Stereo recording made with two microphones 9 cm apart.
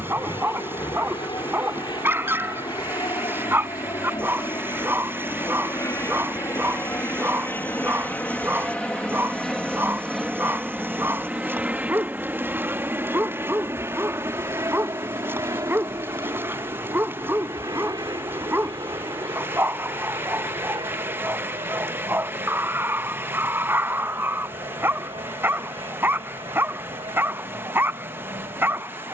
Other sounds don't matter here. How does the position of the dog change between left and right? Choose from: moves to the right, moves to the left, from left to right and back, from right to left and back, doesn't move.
doesn't move.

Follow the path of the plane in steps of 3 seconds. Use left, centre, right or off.
left, left, left, centre, right, right, right, right, right, right.